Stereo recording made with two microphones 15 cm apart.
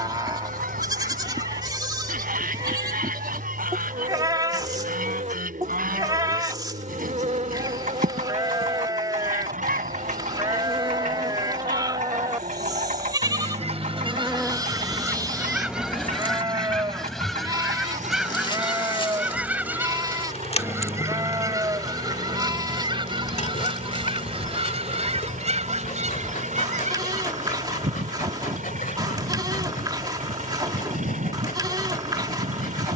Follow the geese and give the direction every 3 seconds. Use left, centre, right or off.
right, right, right, right, right, centre, centre, right, right, right, right.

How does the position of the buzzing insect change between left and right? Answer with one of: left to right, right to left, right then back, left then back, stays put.
right to left.